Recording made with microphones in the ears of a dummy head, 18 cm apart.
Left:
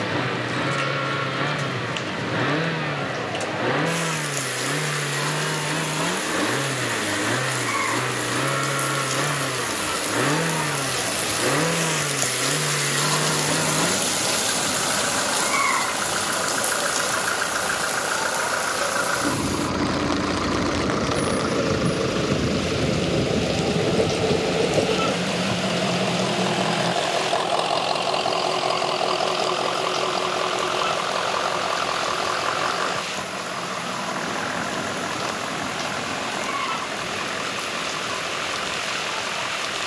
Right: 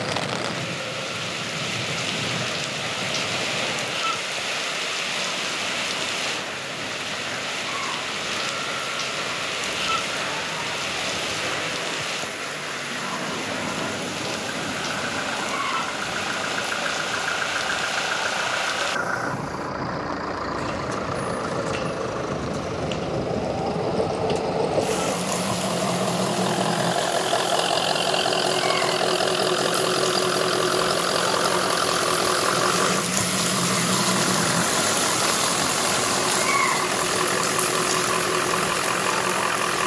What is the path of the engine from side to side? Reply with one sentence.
You can hear the engine travel towards the right.